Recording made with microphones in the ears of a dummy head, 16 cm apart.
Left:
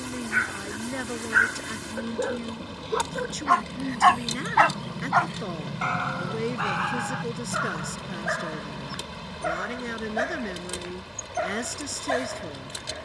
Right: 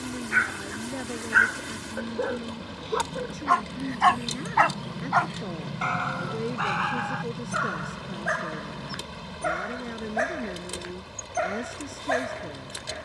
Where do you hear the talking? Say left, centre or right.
left.